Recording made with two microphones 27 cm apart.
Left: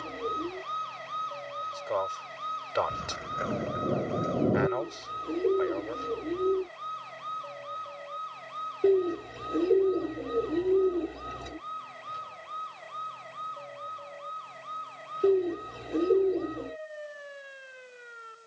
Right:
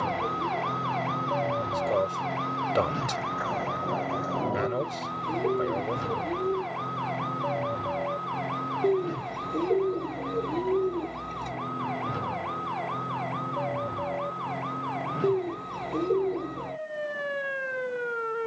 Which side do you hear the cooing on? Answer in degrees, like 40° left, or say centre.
10° left.